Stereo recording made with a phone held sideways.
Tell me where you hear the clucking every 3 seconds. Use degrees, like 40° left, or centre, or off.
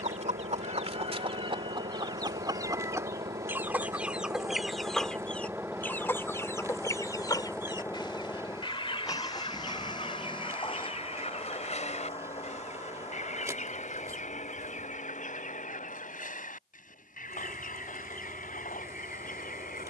30° right, centre, 20° left, 40° left, 50° left, 60° left, 60° left.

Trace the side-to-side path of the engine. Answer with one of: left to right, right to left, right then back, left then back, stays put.
right to left.